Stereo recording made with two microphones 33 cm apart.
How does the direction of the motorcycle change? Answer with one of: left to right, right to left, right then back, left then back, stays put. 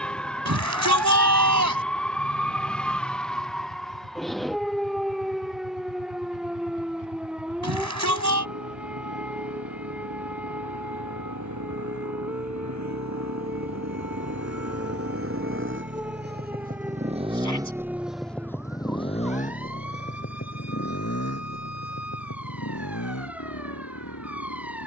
right to left.